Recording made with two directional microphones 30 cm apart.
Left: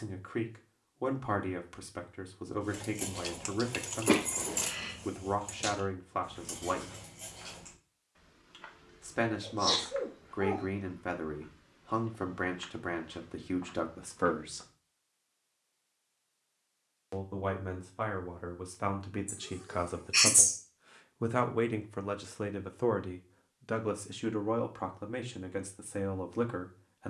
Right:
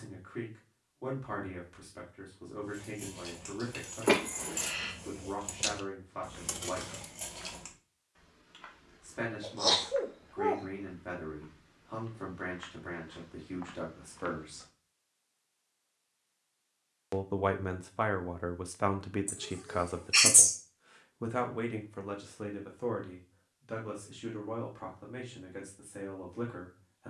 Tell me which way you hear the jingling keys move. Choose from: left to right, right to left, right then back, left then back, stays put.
left to right.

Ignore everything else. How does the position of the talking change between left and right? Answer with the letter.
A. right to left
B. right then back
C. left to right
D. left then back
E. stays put
B.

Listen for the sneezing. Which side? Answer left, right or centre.
right.